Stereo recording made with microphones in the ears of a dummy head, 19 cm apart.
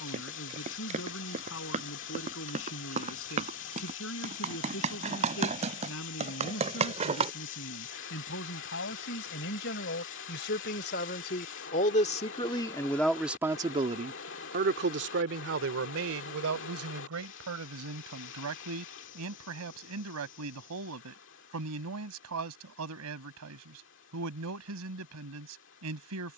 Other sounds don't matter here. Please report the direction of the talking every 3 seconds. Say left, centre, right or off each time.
left, left, left, left, centre, right, right, right, right.